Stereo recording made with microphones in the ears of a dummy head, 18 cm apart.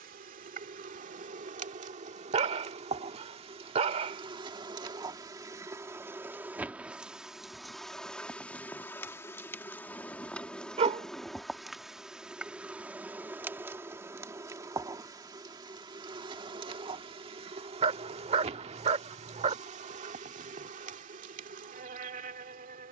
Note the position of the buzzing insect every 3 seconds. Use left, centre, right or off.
right, right, centre, centre, centre, right, right, right.